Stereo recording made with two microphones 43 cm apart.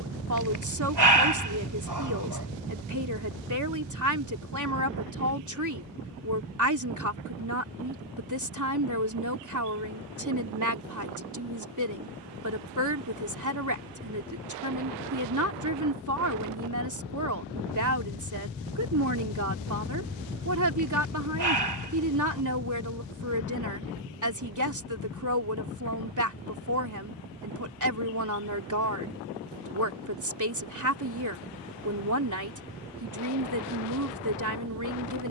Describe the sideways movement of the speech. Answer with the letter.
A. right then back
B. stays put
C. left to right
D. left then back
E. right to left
B.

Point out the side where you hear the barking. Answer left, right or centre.
right.